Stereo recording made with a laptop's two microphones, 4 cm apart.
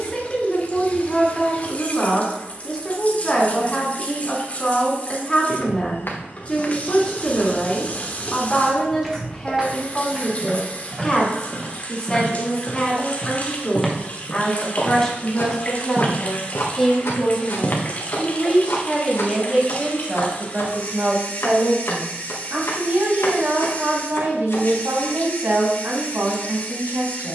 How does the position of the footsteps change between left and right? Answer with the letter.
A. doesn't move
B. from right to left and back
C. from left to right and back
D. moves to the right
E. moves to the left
C.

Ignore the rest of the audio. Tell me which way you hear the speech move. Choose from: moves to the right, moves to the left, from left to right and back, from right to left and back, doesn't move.
moves to the right.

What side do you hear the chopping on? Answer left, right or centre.
left.